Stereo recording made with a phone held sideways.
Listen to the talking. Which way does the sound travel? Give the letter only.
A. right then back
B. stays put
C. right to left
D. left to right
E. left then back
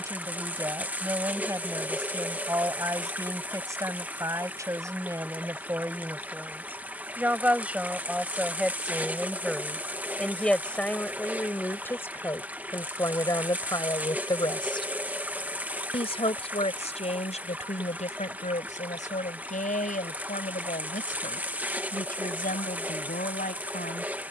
C.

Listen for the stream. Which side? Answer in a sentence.
In this clip you hear the stream in the centre.